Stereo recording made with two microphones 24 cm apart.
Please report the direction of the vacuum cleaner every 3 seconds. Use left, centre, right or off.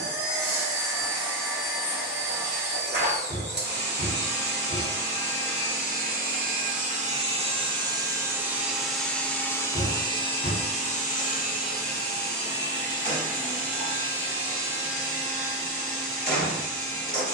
right, right, right, left, left, left.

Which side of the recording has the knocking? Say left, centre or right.
left.